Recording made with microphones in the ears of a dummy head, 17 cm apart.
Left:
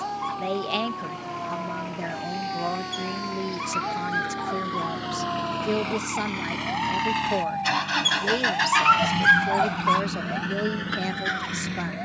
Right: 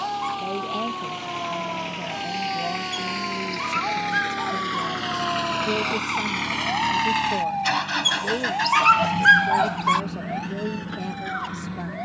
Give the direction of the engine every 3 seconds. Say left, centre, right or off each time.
right, right, centre, left.